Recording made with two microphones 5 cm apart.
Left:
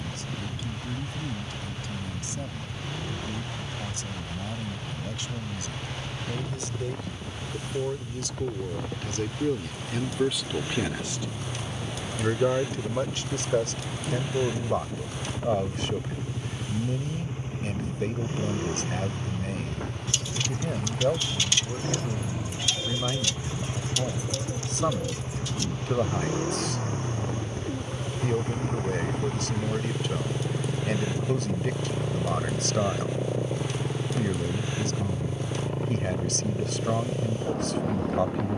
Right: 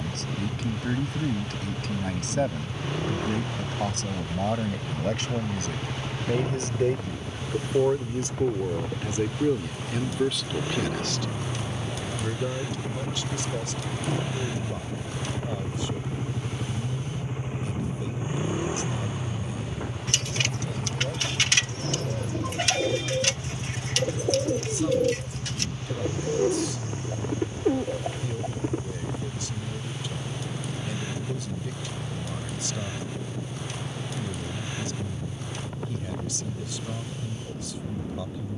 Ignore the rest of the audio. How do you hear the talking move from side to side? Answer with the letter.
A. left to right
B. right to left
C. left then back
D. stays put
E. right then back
B.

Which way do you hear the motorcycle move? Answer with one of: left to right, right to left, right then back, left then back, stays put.
right to left.